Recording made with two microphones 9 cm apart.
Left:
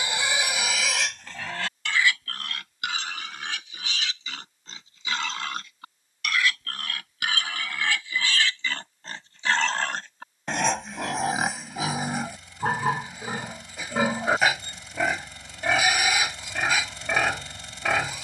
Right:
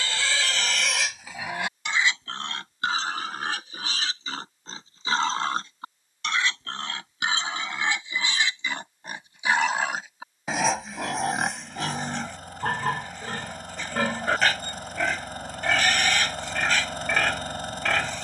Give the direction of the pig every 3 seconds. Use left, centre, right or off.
centre, right, right, centre, centre, centre.